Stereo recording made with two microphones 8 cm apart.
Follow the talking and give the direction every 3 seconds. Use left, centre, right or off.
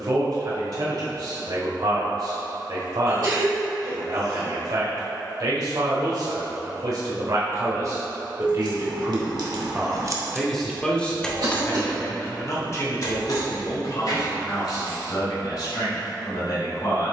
right, right, right, centre, left, left.